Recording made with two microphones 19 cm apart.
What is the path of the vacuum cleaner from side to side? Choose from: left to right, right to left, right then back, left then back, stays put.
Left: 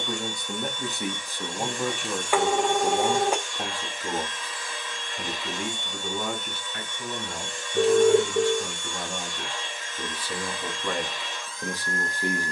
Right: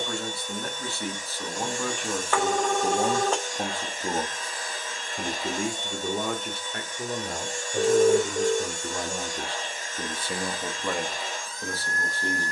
stays put.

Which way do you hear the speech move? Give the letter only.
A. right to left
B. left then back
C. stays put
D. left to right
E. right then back
E.